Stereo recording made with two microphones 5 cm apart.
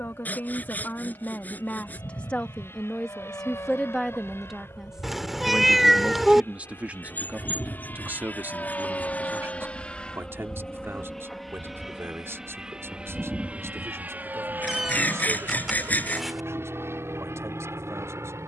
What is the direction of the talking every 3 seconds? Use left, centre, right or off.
left, centre, right, right, right, right.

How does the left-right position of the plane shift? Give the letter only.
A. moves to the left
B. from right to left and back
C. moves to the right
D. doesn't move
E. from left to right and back
C.